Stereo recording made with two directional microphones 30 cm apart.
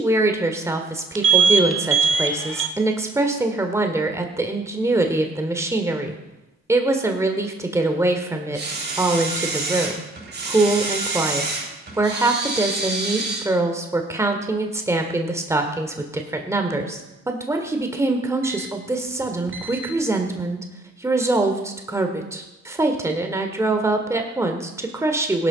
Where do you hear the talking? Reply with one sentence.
You can hear the talking in the centre.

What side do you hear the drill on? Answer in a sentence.
In this clip you hear the drill on the right.